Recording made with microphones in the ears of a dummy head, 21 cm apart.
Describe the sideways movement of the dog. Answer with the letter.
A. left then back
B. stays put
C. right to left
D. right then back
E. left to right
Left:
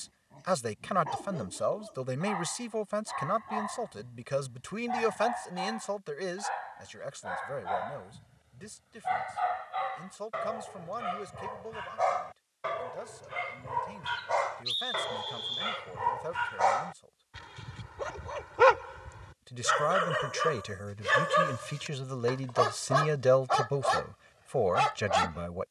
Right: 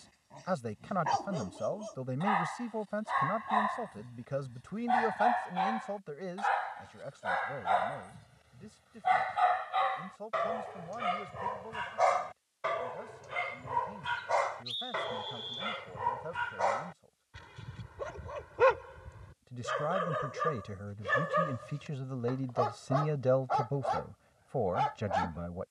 C.